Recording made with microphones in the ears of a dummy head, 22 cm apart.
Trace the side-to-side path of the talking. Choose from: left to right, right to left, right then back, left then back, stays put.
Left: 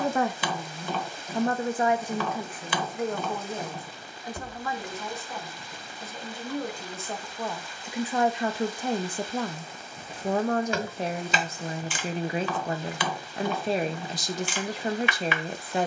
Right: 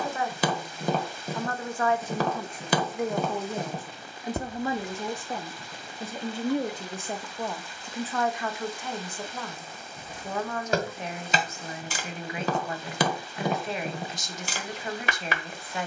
right then back.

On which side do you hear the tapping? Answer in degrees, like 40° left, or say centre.
30° right.